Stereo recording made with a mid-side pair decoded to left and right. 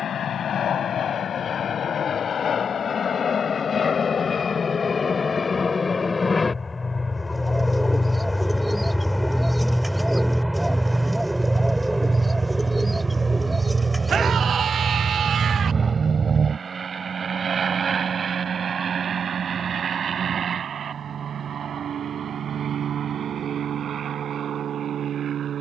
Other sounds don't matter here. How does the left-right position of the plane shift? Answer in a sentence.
In this clip you hear the plane travel towards the right.